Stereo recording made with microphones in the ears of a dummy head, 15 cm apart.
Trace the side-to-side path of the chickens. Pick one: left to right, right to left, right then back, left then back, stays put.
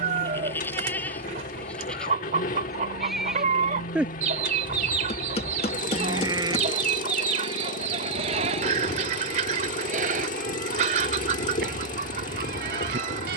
stays put.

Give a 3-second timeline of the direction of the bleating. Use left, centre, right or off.
centre, centre, right, right, right.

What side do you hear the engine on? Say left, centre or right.
left.